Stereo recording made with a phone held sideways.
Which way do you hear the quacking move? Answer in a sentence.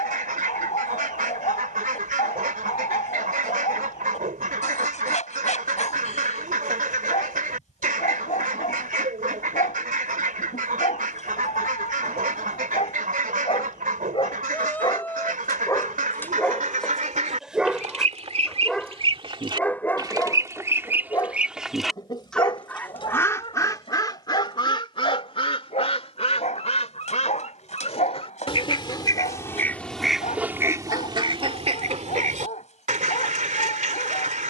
In this clip you hear the quacking move from right to left and back again.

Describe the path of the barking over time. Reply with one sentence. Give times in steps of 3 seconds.
In this clip you hear the barking on the left from 0 s, in the centre from 15 s and on the left from 21 s.